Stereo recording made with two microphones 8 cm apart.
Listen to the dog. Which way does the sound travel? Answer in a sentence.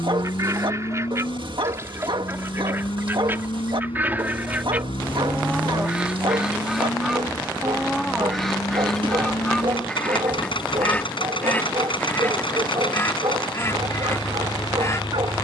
In this clip you hear the dog stay put.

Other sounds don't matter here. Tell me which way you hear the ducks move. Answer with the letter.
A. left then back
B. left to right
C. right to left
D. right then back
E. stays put
C.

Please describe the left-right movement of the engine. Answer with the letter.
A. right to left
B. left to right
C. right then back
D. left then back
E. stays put
E.